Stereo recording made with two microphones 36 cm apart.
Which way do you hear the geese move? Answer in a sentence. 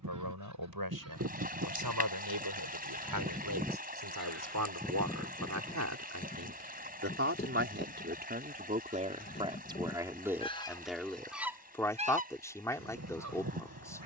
You can hear the geese move from right to left and back again.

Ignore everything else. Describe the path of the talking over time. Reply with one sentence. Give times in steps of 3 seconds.
In this clip you hear the talking on the right from 0 s and in the centre from 9 s.